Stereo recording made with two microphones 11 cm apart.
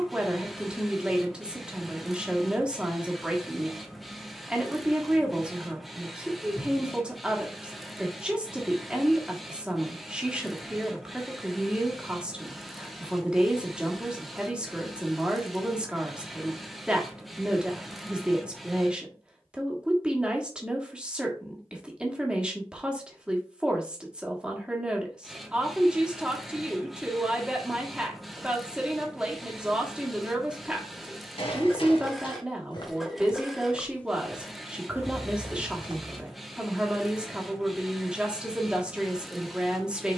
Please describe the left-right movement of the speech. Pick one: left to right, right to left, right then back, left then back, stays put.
stays put.